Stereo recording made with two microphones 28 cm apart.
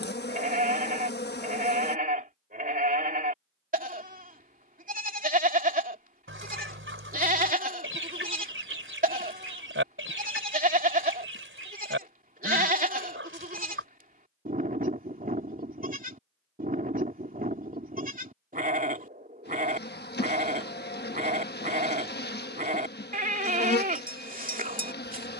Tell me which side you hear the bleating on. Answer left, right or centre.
right.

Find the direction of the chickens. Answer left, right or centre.
right.